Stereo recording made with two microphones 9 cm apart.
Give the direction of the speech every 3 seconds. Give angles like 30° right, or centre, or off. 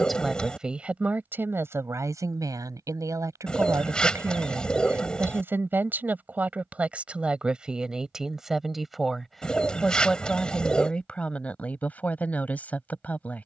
20° right, 30° right, 10° right, 10° left, 20° left.